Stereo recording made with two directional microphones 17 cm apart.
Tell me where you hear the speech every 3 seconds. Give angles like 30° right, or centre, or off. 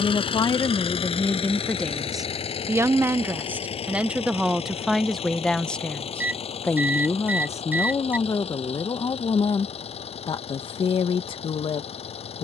10° left, centre, 20° left, 30° left.